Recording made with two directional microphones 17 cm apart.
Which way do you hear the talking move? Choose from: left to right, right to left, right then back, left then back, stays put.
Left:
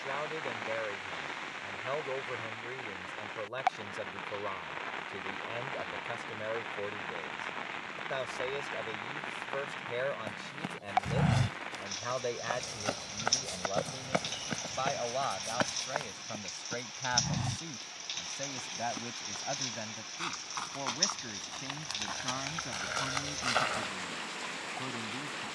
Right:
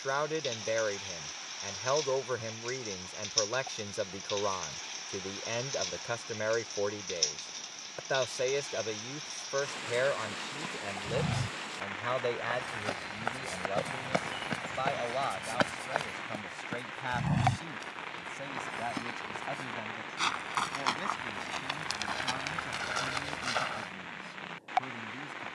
right to left.